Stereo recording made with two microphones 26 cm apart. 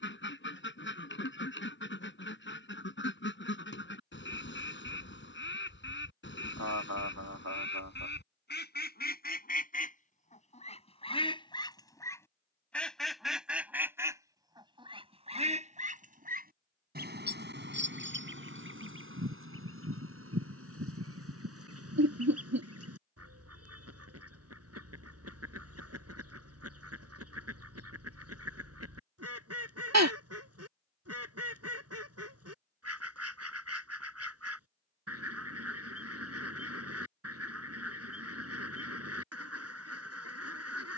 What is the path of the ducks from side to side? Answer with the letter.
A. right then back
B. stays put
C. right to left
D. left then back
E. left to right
E.